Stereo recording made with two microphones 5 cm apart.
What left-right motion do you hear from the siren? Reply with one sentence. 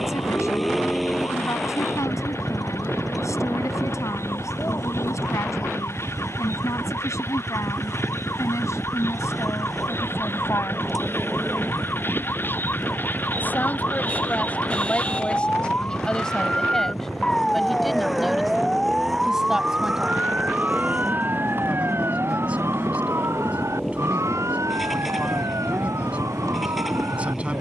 You can hear the siren travel towards the right.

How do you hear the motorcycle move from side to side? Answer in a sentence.
In this clip you hear the motorcycle stay put.